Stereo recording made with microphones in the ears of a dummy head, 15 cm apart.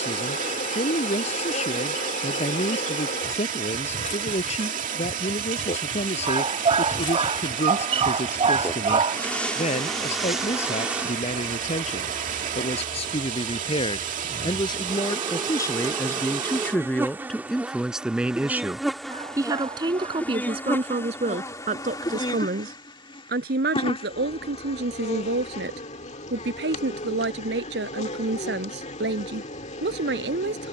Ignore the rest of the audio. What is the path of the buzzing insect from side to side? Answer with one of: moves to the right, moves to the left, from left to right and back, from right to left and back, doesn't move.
from left to right and back.